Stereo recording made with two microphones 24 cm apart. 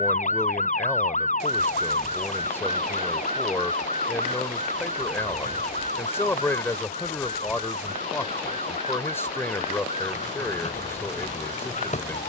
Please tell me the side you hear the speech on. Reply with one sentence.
In this clip you hear the speech in the centre.